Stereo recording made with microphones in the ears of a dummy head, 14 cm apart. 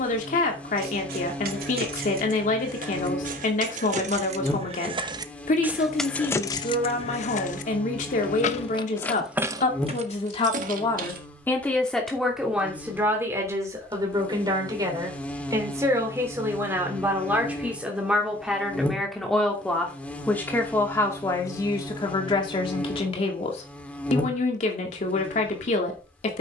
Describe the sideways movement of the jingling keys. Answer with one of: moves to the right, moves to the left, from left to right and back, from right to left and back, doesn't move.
from right to left and back.